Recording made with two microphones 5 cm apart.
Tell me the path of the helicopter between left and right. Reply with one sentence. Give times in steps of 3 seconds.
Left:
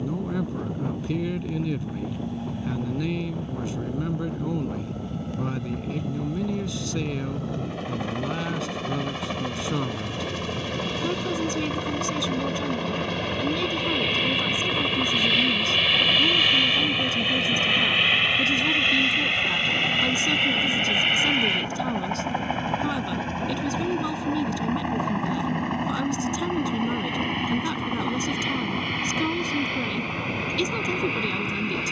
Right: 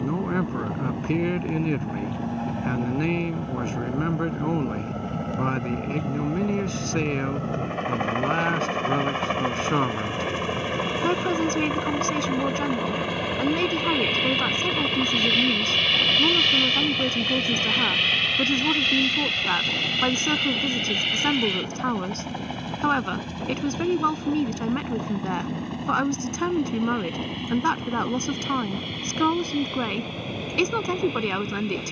In this clip you hear the helicopter on the right from 0 s, in the centre from 12 s and on the left from 18 s.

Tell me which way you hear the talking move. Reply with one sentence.
You can hear the talking stay in one place.